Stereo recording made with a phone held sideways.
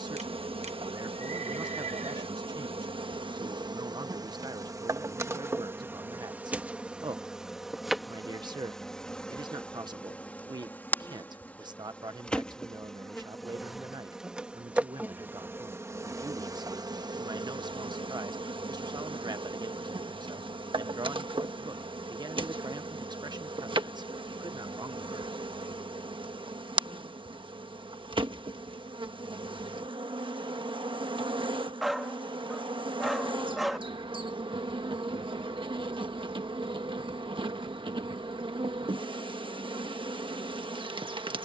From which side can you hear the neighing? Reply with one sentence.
In this clip you hear the neighing on the right.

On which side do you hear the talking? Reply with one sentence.
You can hear the talking on the right.